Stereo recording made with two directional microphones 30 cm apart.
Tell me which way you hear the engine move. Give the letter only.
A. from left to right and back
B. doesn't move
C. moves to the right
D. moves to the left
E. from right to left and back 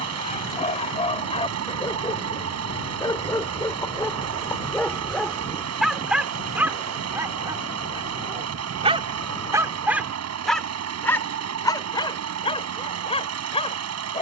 B.